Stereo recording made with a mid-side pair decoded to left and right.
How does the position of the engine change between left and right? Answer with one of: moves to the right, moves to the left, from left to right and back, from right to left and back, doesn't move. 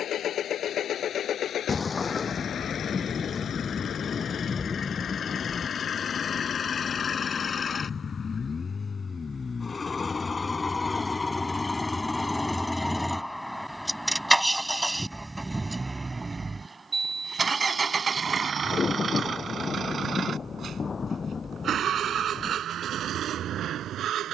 moves to the right.